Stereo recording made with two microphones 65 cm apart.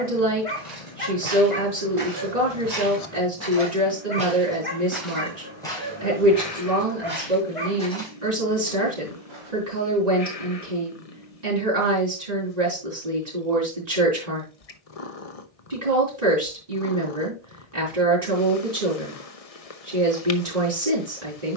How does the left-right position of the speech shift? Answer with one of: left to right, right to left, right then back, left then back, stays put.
stays put.